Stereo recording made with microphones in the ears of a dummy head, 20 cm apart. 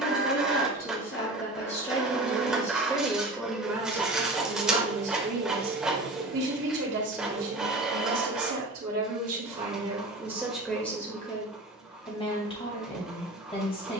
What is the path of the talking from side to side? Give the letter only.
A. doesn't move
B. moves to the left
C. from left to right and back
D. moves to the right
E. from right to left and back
C.